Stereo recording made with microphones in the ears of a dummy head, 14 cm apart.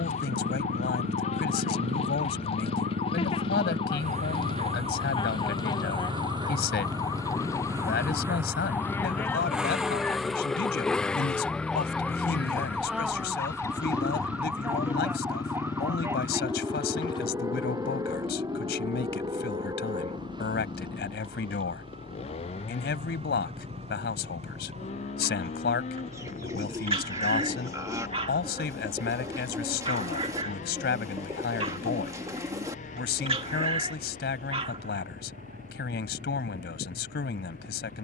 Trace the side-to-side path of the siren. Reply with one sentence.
You can hear the siren travel towards the right.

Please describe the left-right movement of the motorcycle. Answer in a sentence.
You can hear the motorcycle move from right to left.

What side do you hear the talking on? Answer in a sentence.
You can hear the talking on the left.